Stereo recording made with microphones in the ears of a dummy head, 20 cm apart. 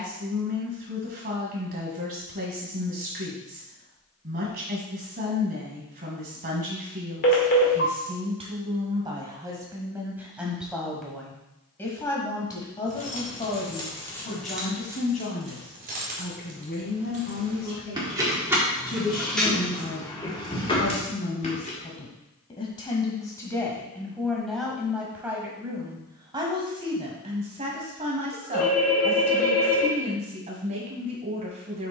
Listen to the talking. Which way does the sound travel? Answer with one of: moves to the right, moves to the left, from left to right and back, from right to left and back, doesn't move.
from right to left and back.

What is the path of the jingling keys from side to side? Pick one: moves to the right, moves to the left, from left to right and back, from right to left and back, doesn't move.
from left to right and back.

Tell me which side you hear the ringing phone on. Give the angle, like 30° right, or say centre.
40° left.